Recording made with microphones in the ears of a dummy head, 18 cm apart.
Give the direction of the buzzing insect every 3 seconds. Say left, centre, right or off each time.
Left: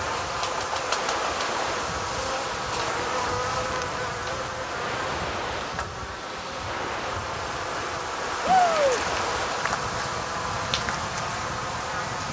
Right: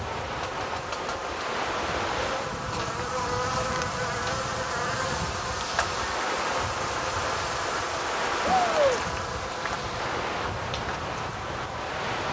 left, centre, centre, left.